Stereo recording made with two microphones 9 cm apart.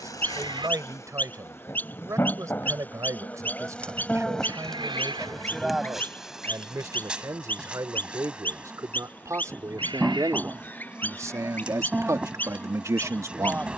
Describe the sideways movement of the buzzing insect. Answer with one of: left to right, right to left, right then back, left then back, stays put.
left to right.